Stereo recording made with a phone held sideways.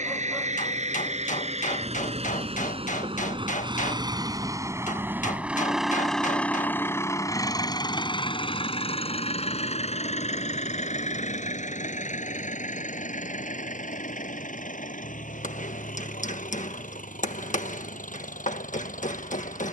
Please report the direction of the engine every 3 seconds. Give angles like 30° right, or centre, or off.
50° right, 20° right, 30° left, 60° left, 70° left, 80° left, 80° left.